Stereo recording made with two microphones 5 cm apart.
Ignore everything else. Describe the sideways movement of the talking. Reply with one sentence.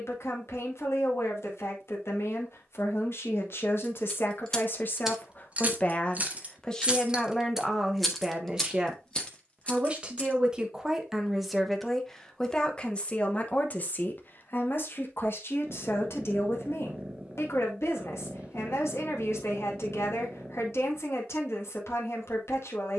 You can hear the talking go right and come back.